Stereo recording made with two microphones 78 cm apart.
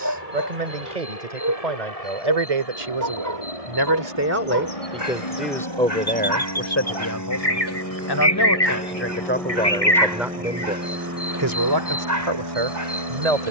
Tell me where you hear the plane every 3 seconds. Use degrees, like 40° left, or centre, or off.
60° left, 40° left, 20° left, 10° right, 30° right.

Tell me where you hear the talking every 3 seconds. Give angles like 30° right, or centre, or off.
50° right, 10° right, 20° left, 10° right, 50° right.